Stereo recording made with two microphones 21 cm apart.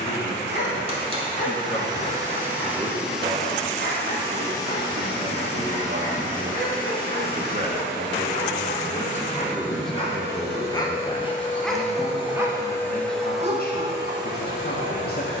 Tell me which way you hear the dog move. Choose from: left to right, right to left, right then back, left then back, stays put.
left to right.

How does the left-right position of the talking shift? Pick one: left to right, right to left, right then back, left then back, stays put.
right then back.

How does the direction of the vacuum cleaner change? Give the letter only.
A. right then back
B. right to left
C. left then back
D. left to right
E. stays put
C.